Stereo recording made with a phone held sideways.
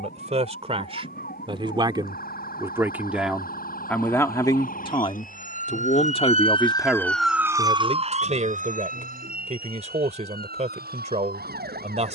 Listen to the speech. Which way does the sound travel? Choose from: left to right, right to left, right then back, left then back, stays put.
left then back.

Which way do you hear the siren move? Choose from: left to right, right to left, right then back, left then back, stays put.
left to right.